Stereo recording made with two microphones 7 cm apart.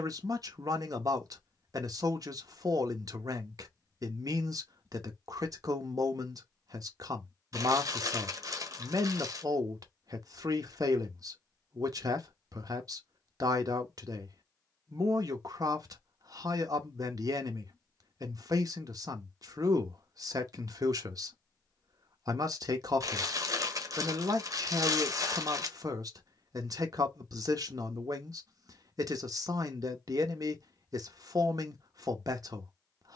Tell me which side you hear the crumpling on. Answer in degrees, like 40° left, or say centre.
50° right.